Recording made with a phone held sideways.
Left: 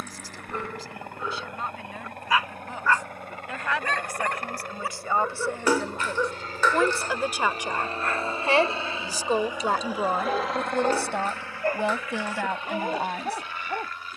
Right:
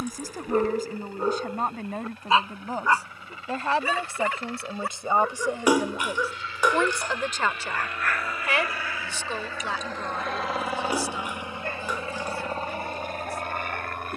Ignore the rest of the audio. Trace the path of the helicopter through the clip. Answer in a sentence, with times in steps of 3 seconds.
In this clip you hear the helicopter on the left from 0 s, in the centre from 9 s and on the right from 12 s.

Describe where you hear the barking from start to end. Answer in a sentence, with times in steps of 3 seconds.
In this clip you hear the barking on the right from 0 s, in the centre from 3 s and on the left from 6 s.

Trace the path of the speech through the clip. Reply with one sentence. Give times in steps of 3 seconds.
In this clip you hear the speech on the right from 0 s, in the centre from 6 s and on the left from 9 s.